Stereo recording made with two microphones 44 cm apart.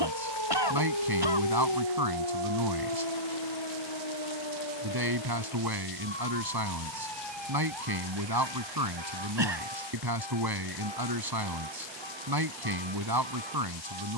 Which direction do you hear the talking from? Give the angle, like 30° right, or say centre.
60° right.